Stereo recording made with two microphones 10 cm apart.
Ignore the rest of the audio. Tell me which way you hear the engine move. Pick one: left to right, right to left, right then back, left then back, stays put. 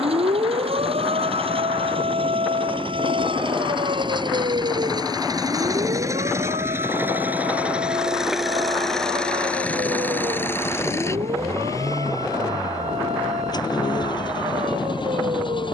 right to left.